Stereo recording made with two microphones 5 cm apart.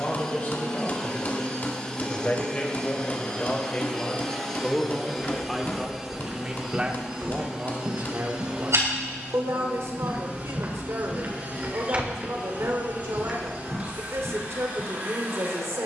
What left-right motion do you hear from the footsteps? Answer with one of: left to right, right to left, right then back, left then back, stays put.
right then back.